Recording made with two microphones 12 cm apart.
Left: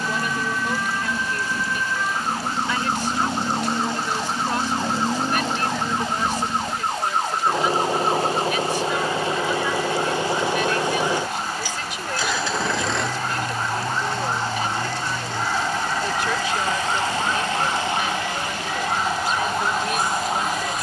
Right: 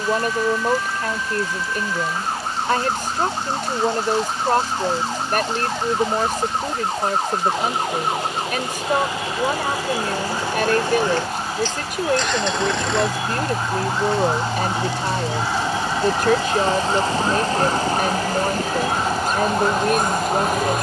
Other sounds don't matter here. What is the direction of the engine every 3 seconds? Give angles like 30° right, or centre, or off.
50° left, 50° left, 40° left, 20° left, centre, 30° right, 50° right.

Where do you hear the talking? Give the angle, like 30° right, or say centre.
50° right.